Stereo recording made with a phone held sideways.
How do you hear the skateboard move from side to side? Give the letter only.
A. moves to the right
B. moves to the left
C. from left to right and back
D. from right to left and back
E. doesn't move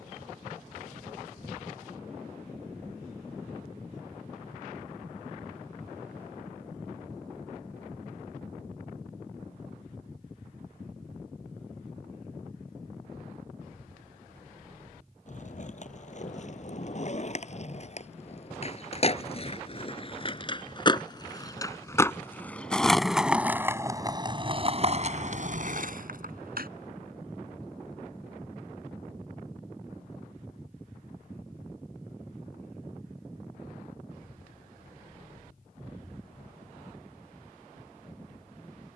A.